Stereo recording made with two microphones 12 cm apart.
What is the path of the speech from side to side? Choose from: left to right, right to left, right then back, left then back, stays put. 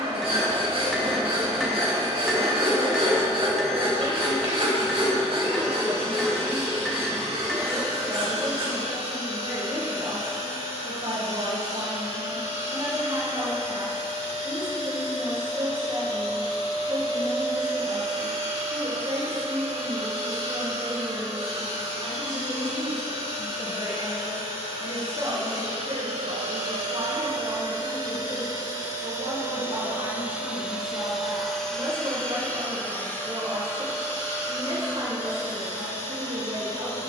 stays put.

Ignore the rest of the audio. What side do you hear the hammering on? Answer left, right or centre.
centre.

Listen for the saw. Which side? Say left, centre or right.
right.